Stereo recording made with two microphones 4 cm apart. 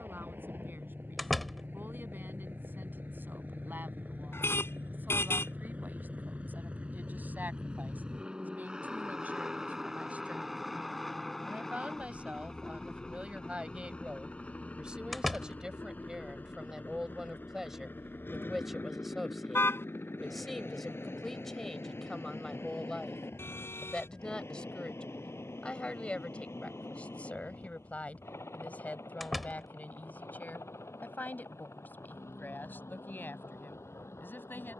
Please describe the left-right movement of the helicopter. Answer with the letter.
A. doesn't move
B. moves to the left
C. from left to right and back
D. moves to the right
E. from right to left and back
B.